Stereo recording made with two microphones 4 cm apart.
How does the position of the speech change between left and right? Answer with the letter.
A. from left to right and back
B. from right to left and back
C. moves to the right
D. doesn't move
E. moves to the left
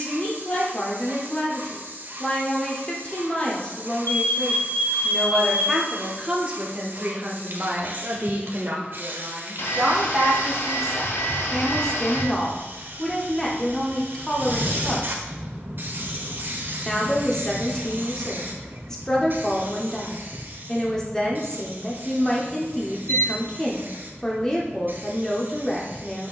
A.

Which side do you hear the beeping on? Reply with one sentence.
In this clip you hear the beeping on the left.